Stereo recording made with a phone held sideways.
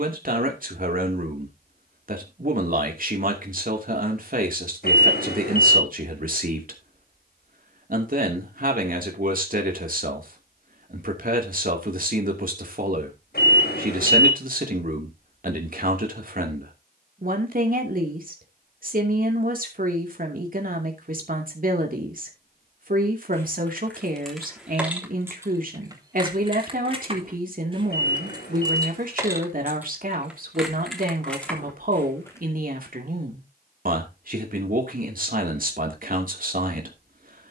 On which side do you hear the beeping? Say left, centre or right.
left.